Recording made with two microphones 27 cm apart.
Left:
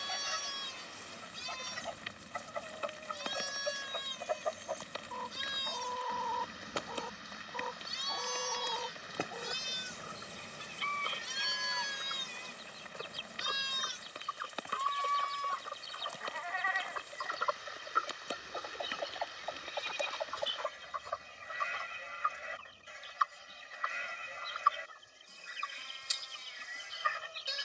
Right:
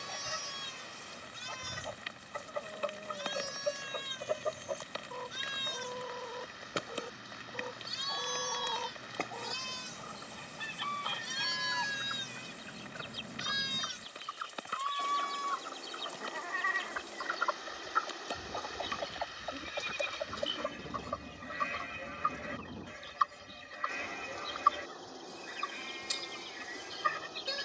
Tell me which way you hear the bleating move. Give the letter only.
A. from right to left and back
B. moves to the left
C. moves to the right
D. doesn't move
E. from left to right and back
C.